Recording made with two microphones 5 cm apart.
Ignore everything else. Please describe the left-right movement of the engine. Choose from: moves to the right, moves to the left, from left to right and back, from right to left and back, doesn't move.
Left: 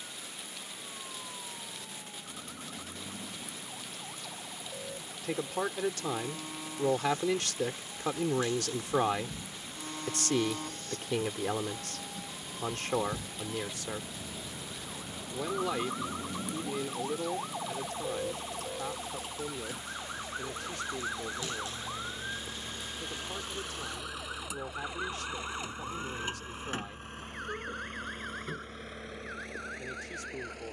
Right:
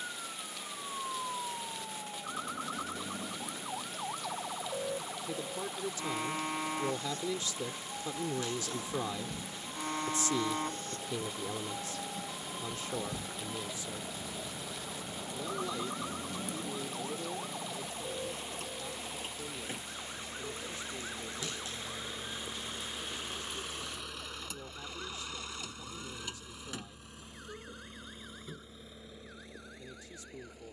moves to the left.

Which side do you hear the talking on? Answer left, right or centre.
left.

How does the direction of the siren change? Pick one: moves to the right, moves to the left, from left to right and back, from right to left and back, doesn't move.
moves to the left.